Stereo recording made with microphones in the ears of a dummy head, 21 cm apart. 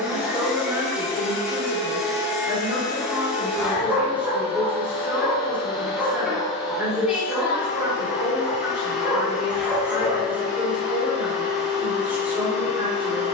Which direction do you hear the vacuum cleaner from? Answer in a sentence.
You can hear the vacuum cleaner in the centre.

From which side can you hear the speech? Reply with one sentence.
You can hear the speech in the centre.